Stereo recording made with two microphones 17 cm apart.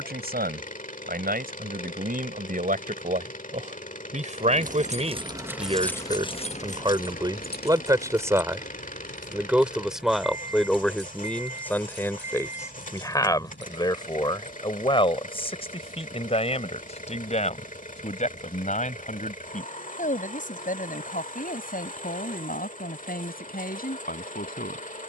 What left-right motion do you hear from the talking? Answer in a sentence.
In this clip you hear the talking move from right to left.